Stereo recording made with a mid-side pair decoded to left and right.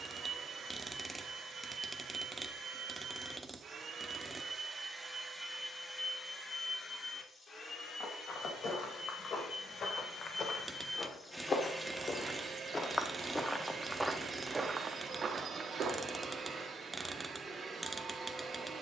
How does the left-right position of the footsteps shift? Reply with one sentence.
You can hear the footsteps move from left to right.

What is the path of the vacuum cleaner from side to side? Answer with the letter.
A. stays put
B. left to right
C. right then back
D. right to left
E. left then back
E.